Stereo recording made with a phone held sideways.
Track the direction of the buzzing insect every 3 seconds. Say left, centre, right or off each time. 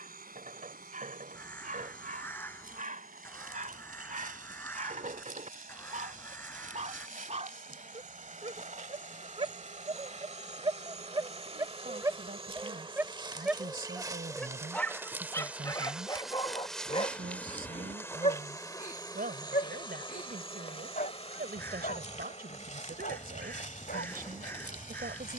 right, right, right, right, right, centre, left, left, left.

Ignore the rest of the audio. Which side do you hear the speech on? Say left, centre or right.
right.